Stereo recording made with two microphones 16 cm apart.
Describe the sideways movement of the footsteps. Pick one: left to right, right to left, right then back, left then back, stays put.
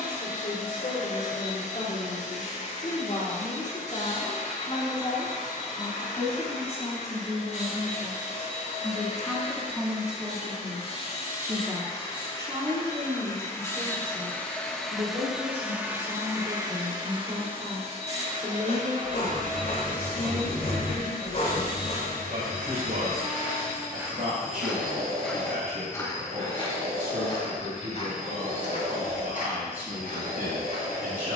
right to left.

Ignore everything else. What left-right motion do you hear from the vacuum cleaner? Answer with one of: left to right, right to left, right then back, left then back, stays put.
left to right.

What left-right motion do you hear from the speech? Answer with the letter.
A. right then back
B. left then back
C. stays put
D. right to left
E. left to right
E.